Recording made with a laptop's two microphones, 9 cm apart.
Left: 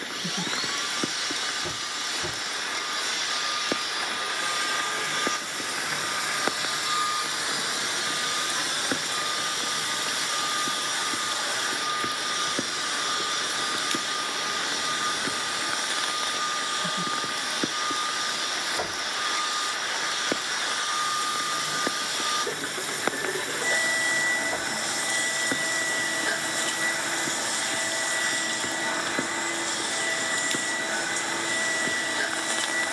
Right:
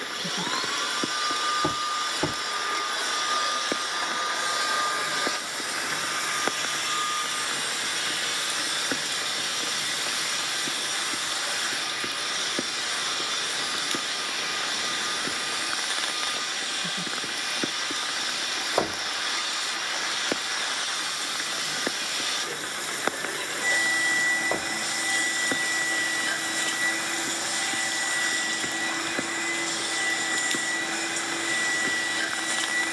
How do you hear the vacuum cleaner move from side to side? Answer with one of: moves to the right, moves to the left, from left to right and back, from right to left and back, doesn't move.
moves to the left.